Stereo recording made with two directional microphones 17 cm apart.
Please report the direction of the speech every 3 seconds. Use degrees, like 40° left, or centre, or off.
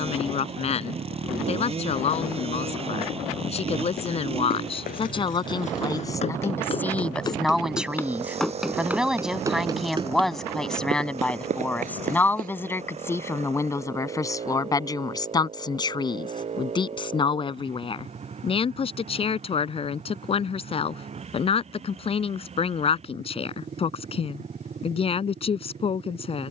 40° left, 30° left, centre, centre, 20° left, 30° left, 40° left, 40° left, 40° left.